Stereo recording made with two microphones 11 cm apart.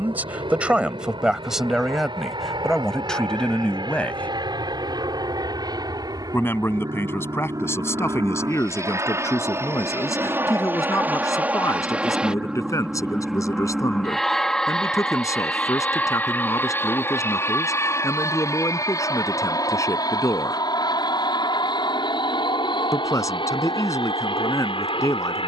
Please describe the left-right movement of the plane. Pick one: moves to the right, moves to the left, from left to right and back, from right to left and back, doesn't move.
moves to the left.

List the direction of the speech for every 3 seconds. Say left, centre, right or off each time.
centre, centre, left, left, left, left, left, left, left.